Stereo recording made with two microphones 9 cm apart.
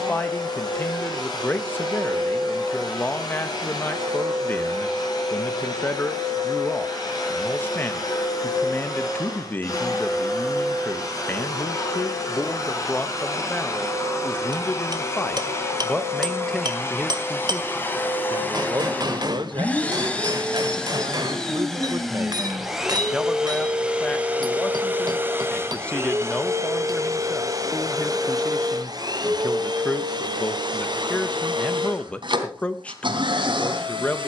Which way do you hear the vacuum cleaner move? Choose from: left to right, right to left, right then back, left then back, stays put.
left to right.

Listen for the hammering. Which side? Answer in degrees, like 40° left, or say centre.
50° right.